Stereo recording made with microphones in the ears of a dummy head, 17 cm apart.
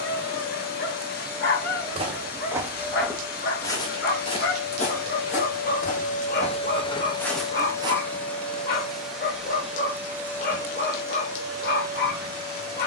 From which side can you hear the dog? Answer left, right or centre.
left.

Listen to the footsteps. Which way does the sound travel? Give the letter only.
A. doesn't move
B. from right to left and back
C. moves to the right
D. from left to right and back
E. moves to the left
B.